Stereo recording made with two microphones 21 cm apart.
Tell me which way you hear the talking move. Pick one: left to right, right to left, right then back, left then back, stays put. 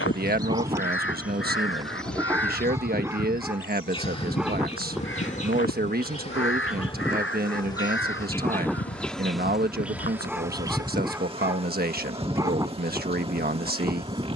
stays put.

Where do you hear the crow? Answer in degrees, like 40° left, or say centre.
70° left.